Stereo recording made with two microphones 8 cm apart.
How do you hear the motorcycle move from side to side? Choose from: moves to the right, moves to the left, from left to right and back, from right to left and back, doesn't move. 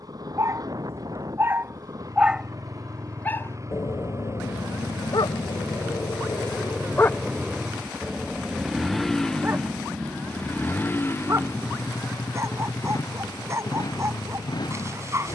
moves to the left.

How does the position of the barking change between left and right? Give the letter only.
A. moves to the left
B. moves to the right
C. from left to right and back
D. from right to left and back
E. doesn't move
D.